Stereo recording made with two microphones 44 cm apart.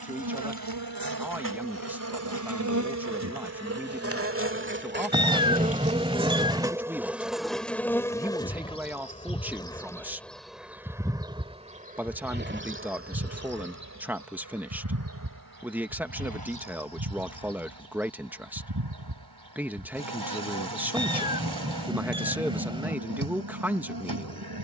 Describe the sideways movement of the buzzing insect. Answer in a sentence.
You can hear the buzzing insect move from right to left and back again.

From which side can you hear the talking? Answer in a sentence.
In this clip you hear the talking in the centre.